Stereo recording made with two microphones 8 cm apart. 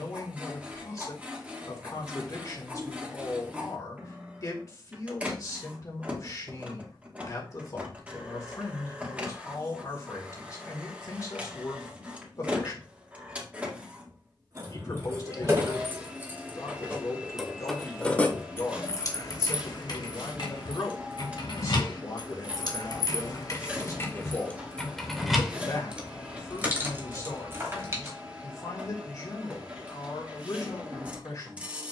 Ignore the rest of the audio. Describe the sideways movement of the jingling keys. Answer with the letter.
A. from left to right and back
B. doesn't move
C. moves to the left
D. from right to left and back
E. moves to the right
D.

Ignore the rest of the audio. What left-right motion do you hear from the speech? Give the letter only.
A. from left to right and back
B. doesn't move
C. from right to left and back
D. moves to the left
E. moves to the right
B.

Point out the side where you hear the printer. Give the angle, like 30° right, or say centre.
20° right.